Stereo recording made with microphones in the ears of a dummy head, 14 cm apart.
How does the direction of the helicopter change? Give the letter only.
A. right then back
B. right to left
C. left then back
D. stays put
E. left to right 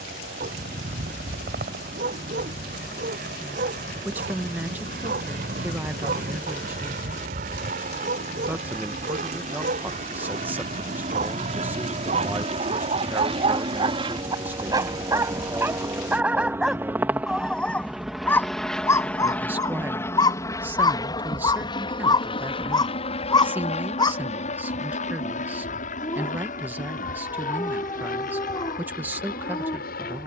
B.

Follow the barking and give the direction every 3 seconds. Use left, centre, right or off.
right, right, right, right, right, centre, left, left, left, left.